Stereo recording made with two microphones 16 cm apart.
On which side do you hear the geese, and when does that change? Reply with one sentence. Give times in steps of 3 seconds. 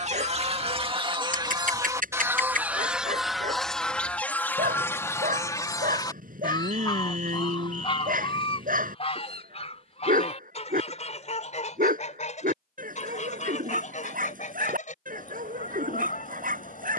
You can hear the geese on the right from 0 s, in the centre from 3 s and on the left from 6 s.